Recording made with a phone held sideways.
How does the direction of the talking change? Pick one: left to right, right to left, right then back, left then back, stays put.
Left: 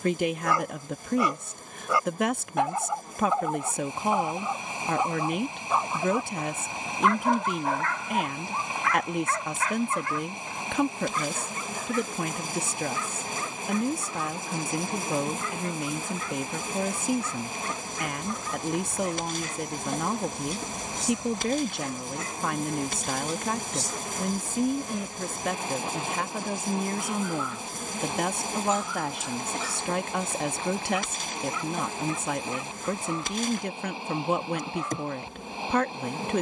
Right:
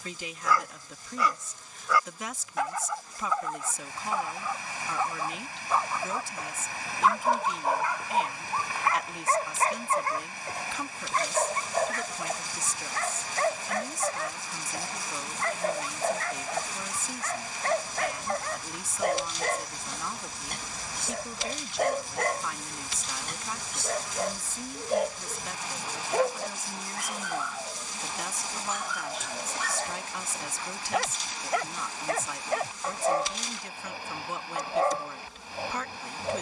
stays put.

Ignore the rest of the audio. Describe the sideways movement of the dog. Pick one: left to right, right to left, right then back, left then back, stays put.
left to right.